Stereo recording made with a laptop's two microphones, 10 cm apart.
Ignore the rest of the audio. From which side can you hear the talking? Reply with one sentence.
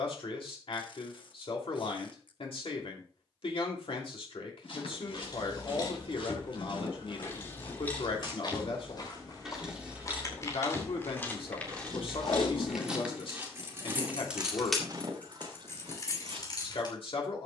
In this clip you hear the talking on the left.